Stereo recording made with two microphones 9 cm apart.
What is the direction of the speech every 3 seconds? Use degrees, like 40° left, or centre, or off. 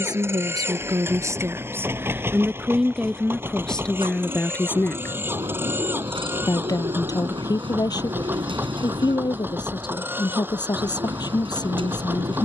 30° right, 10° left, 40° left, 50° left.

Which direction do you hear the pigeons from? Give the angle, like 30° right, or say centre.
60° right.